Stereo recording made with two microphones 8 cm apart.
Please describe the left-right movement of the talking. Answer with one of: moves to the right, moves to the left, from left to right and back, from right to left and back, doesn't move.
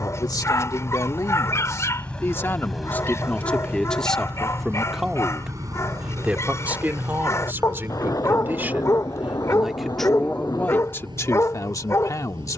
from left to right and back.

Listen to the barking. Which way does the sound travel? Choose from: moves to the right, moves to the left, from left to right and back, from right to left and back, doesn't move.
doesn't move.